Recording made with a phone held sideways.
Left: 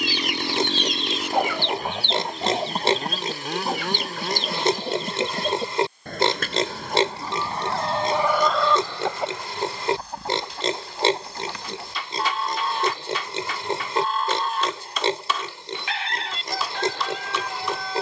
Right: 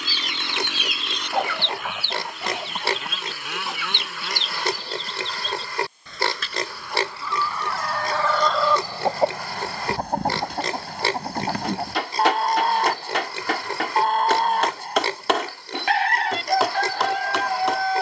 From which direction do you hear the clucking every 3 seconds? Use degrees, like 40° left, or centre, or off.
10° left, 50° left, 30° left, 60° right, 60° right, 60° right.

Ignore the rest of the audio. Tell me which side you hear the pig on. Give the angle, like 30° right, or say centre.
20° left.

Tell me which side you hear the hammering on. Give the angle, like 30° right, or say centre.
70° right.